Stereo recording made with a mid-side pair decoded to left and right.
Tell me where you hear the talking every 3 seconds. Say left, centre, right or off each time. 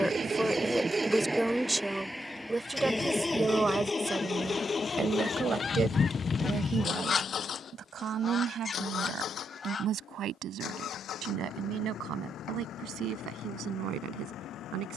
centre, right, right, right, right.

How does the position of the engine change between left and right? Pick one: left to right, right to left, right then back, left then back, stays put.
right to left.